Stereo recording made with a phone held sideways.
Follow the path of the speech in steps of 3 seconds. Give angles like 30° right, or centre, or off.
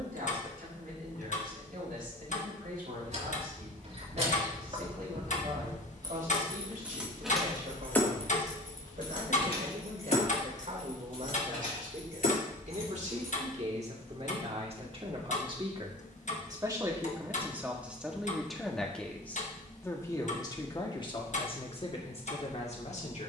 70° right, 70° right, 70° right, 60° right, 50° right, 20° right, 10° left, 40° left.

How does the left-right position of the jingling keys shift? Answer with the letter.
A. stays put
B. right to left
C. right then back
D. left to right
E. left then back
B.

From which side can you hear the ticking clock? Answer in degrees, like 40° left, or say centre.
50° left.